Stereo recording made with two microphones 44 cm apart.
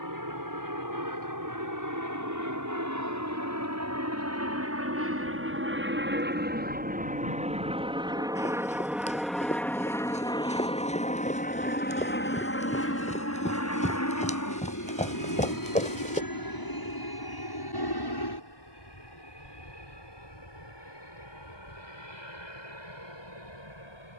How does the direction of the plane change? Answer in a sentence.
In this clip you hear the plane go from the right side to the left.